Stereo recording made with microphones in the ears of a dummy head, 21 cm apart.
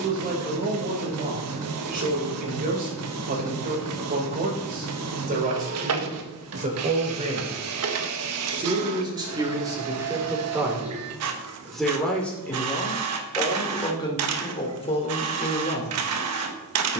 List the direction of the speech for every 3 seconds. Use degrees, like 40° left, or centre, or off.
40° right, 40° right, 30° right, 10° right, 20° left, 30° left.